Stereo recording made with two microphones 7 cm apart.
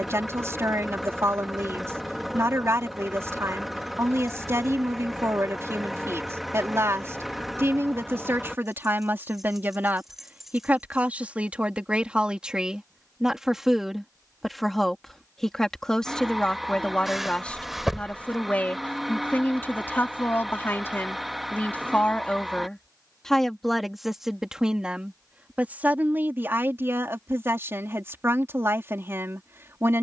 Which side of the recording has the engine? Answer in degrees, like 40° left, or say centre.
centre.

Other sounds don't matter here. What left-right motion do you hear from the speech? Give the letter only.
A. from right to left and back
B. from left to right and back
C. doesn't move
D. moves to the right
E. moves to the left
A.